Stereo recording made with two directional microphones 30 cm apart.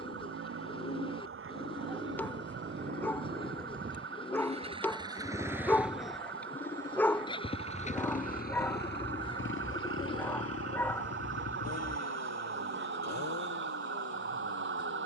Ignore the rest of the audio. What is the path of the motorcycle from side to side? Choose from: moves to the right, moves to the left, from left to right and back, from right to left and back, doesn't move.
moves to the left.